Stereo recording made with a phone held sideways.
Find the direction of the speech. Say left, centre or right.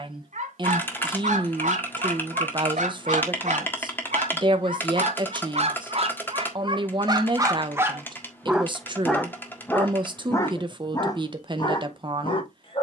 right.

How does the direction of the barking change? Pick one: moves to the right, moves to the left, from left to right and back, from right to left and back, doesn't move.
moves to the left.